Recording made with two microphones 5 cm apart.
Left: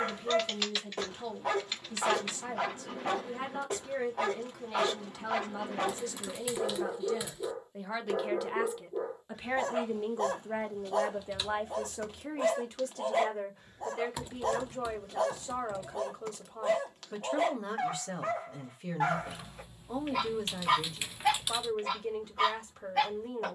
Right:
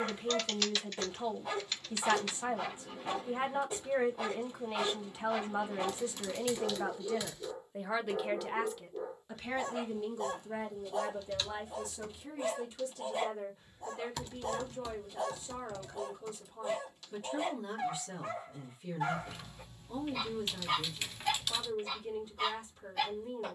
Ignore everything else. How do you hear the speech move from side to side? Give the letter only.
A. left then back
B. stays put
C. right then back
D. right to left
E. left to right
D.